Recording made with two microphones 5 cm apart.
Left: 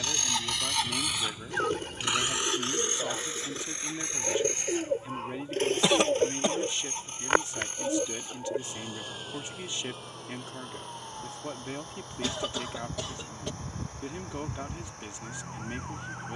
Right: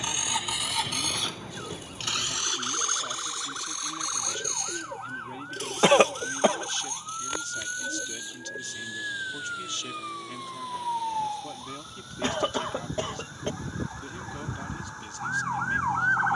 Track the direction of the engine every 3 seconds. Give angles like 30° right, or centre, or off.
10° left, 40° left, 40° left, 50° left, 50° left, 50° left.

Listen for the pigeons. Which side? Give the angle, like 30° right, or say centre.
50° left.